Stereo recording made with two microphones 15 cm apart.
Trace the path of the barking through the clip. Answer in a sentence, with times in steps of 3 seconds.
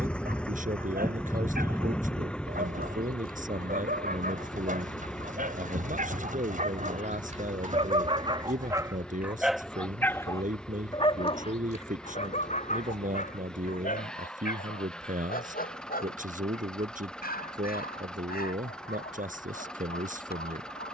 In this clip you hear the barking on the right from 0 s and on the left from 9 s.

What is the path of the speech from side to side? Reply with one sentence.
In this clip you hear the speech stay put.